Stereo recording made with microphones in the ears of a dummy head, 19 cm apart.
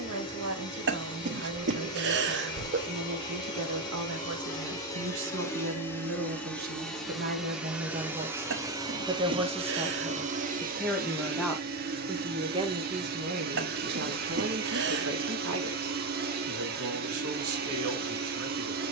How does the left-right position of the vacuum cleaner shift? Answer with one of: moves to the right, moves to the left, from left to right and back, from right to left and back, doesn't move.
moves to the right.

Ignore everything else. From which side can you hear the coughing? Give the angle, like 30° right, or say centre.
50° right.